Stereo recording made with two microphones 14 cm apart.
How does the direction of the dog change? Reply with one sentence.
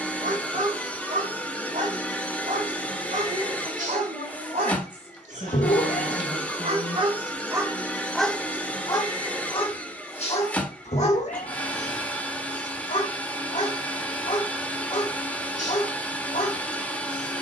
In this clip you hear the dog move to the left.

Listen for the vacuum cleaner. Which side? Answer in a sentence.
You can hear the vacuum cleaner in the centre.